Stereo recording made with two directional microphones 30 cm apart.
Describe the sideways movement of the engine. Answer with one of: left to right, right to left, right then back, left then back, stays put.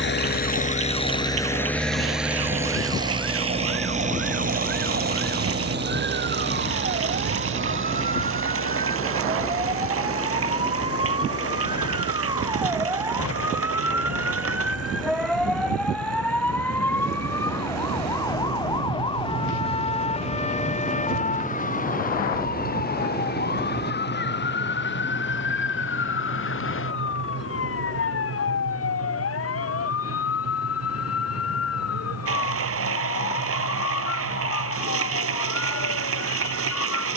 left to right.